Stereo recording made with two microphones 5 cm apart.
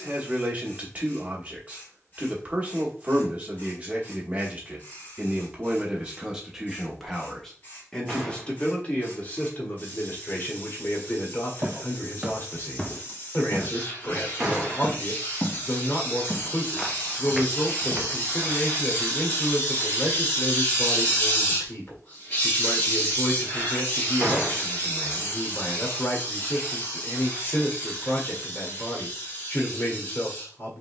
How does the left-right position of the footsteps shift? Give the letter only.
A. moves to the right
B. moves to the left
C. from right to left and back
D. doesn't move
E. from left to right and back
C.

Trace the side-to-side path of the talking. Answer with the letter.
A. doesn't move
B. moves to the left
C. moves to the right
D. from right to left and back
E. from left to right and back
B.